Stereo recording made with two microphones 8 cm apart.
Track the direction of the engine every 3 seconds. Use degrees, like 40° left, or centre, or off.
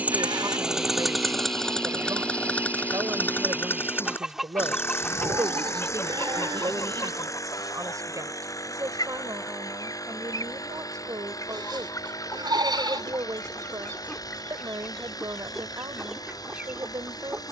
centre, 30° left, 40° left, 50° left, 50° left, 50° left.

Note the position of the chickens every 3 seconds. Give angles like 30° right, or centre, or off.
30° right, centre, 50° left, 50° left, 30° left, 10° right.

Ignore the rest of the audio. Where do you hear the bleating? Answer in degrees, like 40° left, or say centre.
70° right.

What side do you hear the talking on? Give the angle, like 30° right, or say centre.
50° right.